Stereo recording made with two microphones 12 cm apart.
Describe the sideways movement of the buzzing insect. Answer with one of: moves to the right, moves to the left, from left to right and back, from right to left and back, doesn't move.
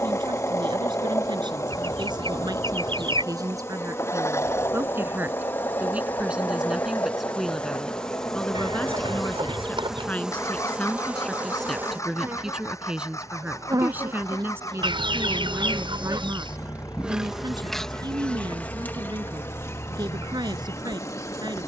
from left to right and back.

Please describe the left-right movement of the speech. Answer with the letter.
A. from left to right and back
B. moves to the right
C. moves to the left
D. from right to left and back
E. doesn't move
D.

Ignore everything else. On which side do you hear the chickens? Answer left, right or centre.
right.